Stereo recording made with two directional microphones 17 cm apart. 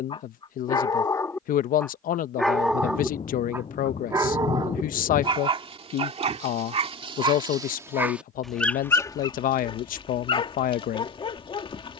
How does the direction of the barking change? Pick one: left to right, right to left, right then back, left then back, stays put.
right then back.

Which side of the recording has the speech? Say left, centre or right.
left.